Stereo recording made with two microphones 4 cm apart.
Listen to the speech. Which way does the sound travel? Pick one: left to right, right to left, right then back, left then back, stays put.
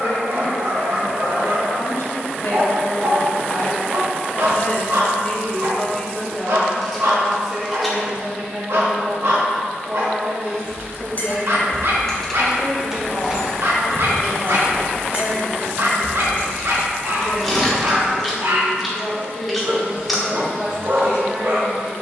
left to right.